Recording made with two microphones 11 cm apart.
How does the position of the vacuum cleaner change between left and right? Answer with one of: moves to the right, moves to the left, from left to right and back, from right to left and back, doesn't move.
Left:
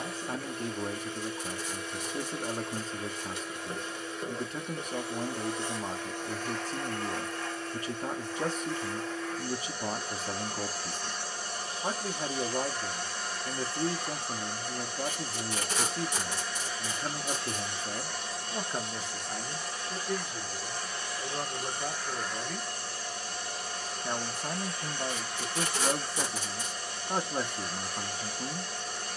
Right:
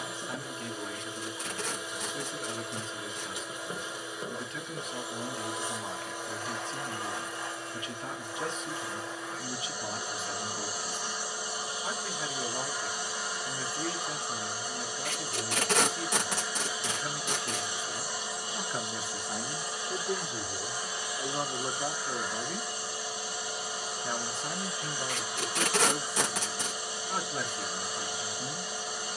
doesn't move.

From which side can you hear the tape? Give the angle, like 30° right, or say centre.
60° right.